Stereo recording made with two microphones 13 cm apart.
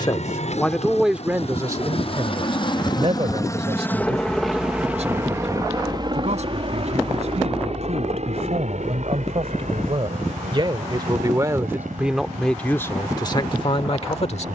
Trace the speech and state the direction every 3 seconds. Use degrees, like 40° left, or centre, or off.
10° right, 50° right, 60° right, 40° right, 30° left.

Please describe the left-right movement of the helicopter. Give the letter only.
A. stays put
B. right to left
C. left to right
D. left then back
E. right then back
C.